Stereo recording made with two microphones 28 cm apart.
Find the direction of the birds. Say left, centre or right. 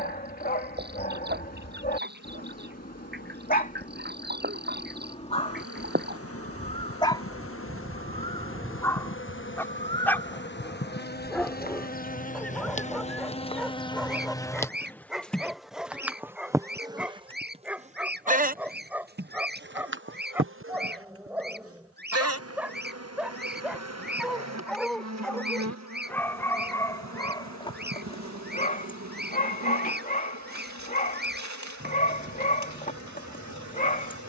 right.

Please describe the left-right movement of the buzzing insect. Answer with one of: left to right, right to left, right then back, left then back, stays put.
left to right.